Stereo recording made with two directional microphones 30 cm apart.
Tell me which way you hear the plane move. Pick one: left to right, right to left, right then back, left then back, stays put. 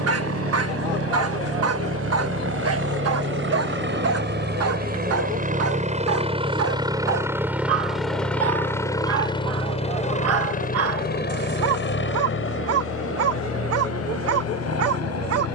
right to left.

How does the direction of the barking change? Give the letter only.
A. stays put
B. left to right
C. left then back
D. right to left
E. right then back
A.